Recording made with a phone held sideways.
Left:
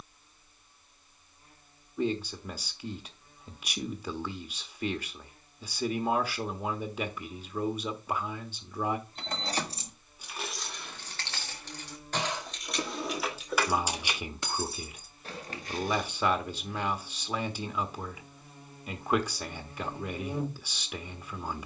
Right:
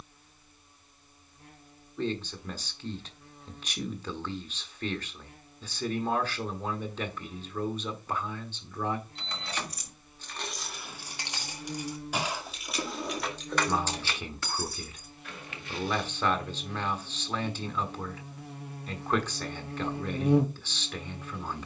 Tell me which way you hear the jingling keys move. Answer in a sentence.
In this clip you hear the jingling keys go right and come back.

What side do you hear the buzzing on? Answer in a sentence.
In this clip you hear the buzzing on the right.